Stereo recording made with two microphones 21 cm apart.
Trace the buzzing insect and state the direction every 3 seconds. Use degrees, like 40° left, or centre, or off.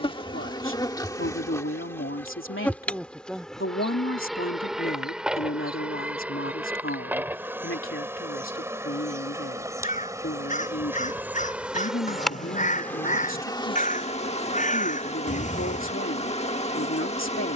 10° left, centre, 10° right, 10° right, 20° left, 30° left.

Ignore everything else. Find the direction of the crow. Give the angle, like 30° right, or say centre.
40° left.